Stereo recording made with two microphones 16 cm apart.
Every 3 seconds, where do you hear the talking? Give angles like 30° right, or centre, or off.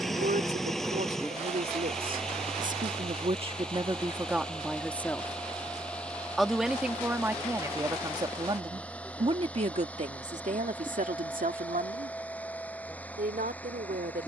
70° right, 10° right, 20° right, 50° right, 70° right.